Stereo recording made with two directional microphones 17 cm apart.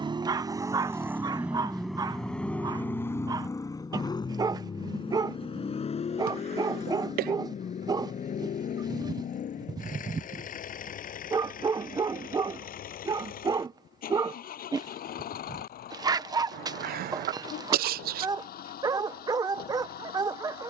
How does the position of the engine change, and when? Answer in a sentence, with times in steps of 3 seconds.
In this clip you hear the engine in the centre from 0 s and on the left from 3 s.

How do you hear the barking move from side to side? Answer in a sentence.
You can hear the barking stay put.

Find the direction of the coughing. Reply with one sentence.
In this clip you hear the coughing on the right.